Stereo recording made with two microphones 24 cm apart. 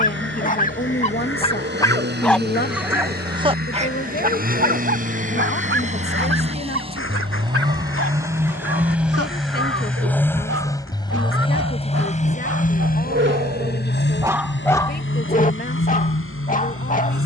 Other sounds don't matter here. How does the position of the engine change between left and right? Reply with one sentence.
In this clip you hear the engine go from the right side to the left.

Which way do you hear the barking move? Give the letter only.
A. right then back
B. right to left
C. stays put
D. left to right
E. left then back
A.